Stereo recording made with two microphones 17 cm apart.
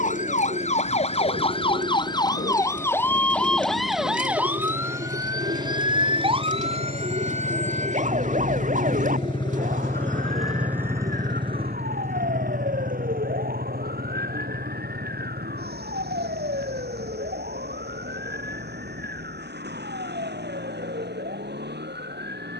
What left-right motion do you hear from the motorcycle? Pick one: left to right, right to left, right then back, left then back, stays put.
left to right.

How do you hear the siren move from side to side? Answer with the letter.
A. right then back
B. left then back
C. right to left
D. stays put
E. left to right
E.